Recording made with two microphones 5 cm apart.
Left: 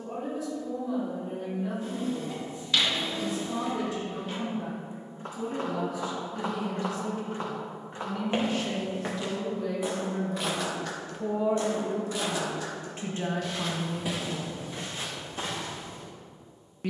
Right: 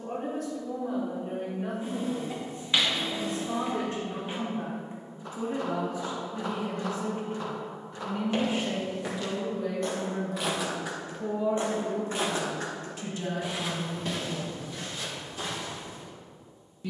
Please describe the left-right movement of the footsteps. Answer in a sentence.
You can hear the footsteps go right and come back.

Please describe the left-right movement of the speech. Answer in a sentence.
You can hear the speech go from the right side to the left.